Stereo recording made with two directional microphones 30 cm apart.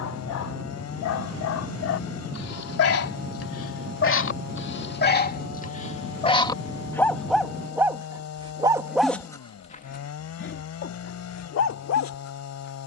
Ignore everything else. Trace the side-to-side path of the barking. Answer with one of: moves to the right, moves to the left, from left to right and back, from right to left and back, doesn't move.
from left to right and back.